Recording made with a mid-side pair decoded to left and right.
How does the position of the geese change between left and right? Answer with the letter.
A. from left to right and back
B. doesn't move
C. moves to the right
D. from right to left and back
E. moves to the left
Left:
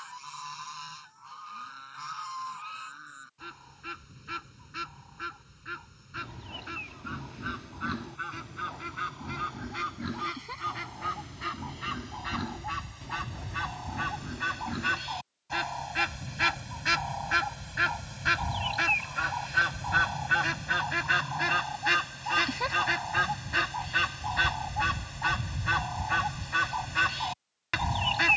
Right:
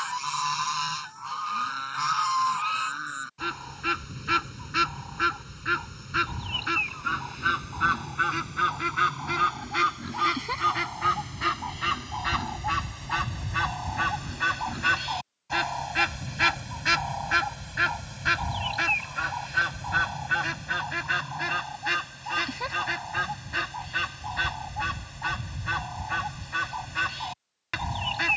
E.